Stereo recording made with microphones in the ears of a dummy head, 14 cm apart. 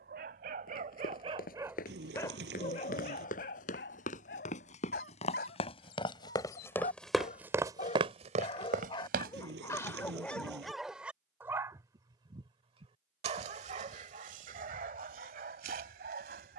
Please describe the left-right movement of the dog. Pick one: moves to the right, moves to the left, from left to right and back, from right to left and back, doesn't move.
from right to left and back.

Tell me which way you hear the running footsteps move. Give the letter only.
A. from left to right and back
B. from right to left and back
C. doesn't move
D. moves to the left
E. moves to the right
E.